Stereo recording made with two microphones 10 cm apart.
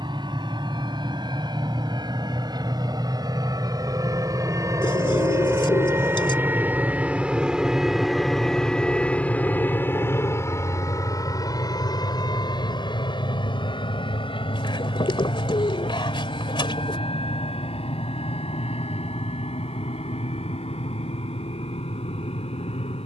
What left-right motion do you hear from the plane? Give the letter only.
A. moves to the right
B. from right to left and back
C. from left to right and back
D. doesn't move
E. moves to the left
E.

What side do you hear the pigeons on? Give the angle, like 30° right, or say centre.
60° left.